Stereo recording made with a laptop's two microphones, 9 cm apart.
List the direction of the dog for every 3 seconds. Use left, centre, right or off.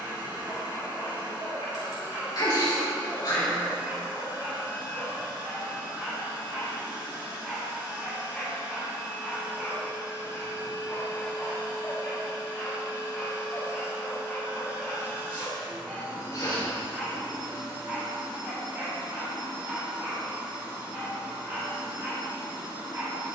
right, right, centre, centre, centre, centre, right, right.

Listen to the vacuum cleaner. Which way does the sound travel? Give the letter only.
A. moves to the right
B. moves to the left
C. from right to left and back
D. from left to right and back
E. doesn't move
E.